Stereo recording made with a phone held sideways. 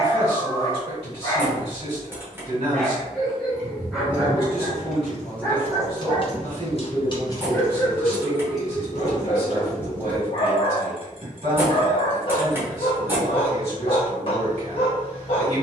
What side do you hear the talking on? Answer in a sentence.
In this clip you hear the talking on the right.